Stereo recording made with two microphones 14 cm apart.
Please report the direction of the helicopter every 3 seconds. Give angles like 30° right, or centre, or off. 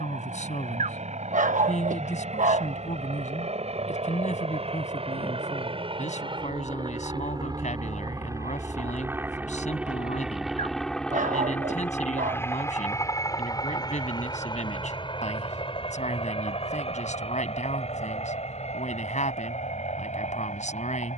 60° right, 50° right, 30° right, centre, 30° left, 40° left, 50° left.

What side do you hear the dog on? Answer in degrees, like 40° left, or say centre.
70° right.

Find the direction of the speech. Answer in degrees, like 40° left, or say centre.
60° left.